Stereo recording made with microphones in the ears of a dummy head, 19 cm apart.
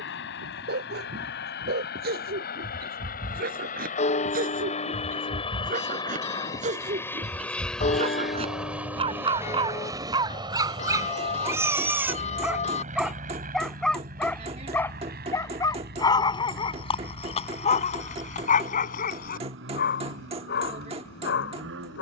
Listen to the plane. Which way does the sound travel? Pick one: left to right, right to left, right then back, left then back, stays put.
left to right.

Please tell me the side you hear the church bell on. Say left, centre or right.
left.